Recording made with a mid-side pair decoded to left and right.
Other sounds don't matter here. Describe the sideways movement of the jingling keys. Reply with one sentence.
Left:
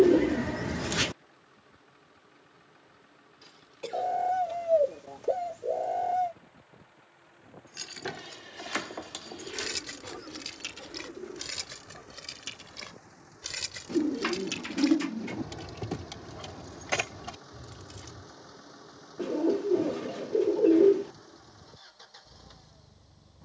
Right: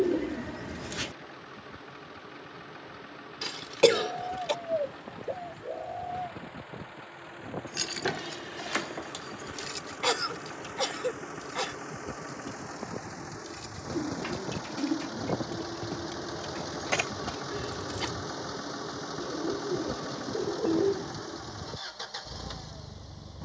In this clip you hear the jingling keys go left and come back.